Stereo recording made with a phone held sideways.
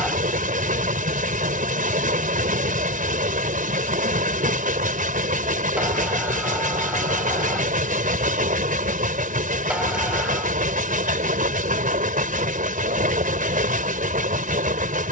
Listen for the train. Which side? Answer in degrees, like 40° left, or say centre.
70° right.